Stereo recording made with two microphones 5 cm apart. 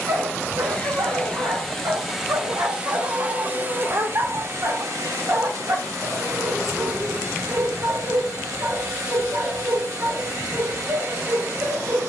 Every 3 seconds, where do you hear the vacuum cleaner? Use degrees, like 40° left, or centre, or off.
centre, 50° right, 80° right, 80° right.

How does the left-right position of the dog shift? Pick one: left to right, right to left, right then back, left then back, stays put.
stays put.